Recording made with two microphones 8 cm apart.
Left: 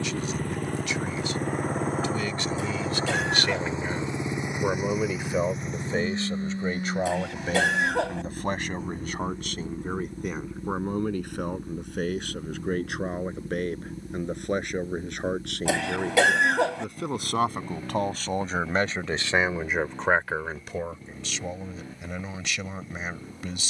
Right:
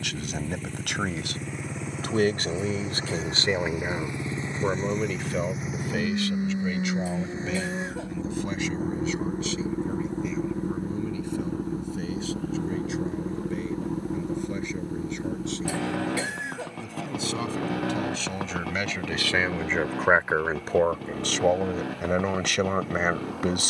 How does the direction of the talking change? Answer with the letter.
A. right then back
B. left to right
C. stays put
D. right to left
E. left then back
E.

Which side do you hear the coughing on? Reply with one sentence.
You can hear the coughing on the left.